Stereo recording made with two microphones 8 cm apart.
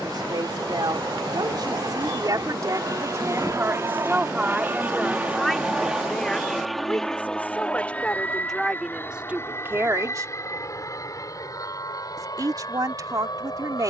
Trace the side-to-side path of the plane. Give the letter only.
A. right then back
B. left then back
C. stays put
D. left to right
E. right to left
E.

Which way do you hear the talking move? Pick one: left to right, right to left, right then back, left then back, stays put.
left then back.